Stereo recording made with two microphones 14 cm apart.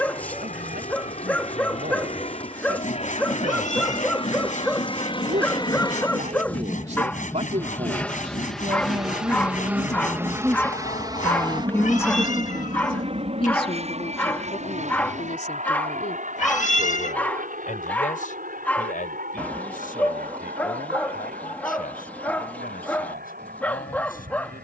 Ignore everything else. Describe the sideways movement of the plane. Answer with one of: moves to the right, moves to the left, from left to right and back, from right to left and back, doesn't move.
moves to the right.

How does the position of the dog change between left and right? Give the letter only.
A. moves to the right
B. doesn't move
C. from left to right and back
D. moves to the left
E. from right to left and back
B.